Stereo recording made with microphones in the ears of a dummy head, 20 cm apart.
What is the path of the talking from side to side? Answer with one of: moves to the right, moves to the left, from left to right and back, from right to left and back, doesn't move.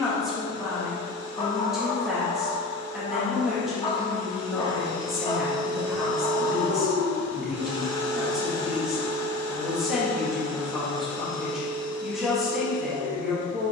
doesn't move.